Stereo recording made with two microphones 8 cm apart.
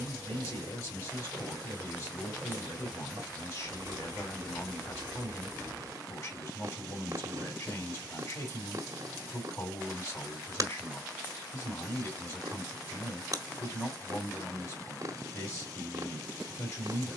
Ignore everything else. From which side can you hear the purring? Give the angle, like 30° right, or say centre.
40° right.